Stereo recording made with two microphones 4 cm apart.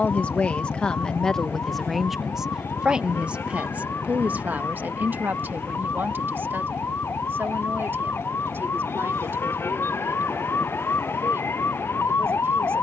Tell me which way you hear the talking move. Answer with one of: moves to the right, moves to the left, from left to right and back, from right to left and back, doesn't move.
moves to the right.